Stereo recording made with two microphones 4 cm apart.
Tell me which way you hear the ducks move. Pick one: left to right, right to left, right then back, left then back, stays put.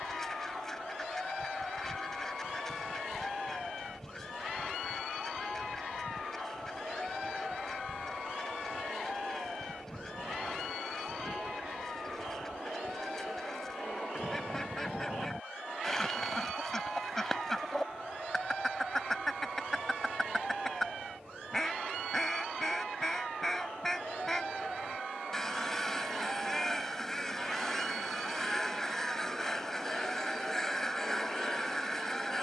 stays put.